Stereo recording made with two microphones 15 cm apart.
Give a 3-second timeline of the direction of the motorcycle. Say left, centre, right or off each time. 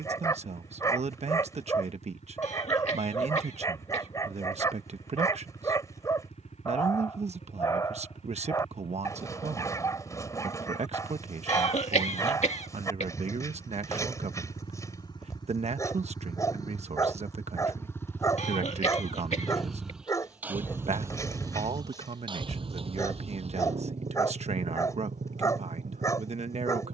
left, left, left, left, left, left, centre, right, right.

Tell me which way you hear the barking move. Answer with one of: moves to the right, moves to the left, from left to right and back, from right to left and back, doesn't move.
doesn't move.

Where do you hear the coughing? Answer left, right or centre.
left.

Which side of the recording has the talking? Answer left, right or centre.
right.